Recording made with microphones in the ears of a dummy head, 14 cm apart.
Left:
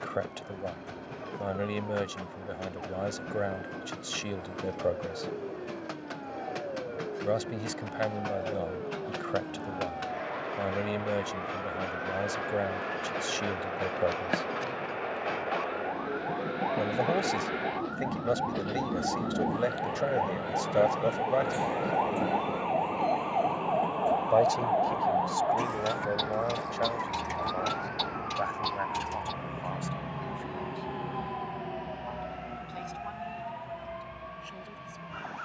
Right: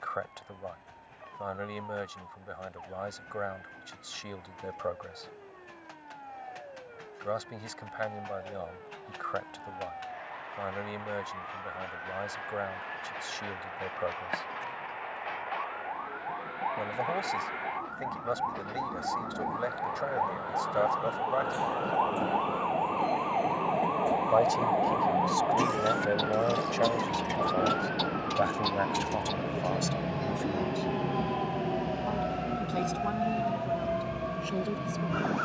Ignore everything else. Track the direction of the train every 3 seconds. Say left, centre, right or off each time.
left, left, left, left, left, left, left, centre, right, right, right, right.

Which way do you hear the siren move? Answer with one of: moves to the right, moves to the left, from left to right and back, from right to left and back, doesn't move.
moves to the right.